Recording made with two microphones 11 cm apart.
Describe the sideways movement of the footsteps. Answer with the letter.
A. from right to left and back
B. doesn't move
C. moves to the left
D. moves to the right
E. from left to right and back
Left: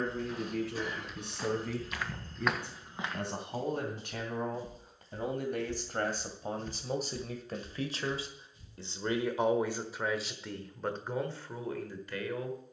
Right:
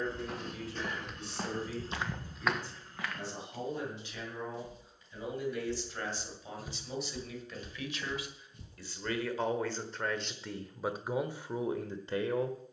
A.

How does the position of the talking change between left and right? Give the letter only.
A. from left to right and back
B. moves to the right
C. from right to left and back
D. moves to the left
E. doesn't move
B.